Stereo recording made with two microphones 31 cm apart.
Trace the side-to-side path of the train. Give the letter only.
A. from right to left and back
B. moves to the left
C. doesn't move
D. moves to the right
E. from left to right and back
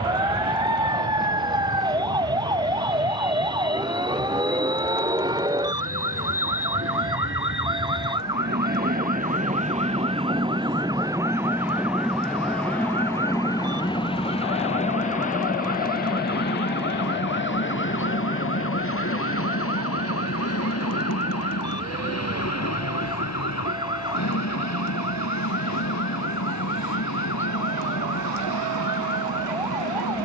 B.